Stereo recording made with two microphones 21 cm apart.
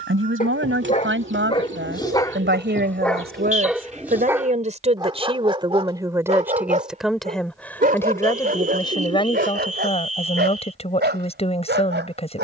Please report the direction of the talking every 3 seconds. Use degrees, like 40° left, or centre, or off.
60° right, 40° right, centre, 30° left.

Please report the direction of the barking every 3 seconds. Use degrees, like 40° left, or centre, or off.
20° left, 10° right, 40° right, 50° right.